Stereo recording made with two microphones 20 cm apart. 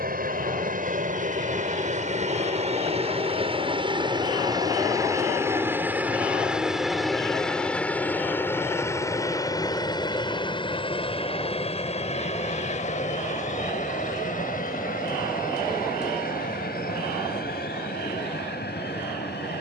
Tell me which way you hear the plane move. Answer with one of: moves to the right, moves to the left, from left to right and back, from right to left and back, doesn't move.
moves to the left.